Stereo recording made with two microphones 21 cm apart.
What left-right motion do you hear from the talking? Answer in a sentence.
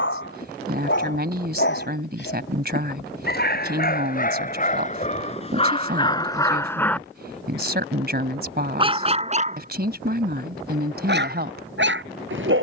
In this clip you hear the talking stay put.